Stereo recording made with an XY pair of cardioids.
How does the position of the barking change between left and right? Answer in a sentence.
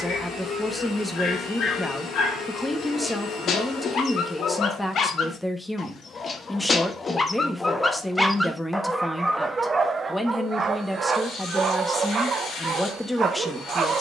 You can hear the barking go from the left side to the right.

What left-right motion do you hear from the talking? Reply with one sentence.
You can hear the talking stay in one place.